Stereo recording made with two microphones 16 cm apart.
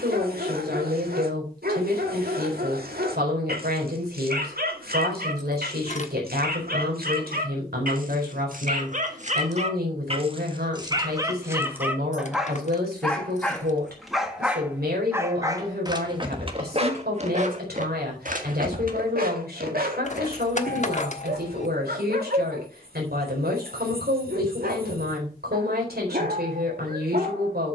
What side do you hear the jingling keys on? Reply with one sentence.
In this clip you hear the jingling keys on the left.